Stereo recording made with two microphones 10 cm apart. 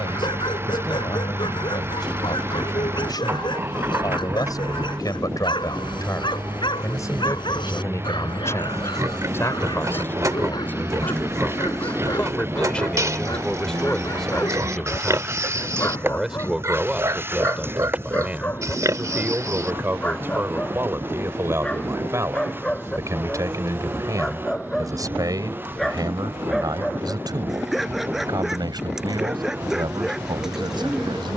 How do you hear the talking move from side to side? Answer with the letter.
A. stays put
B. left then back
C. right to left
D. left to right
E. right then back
D.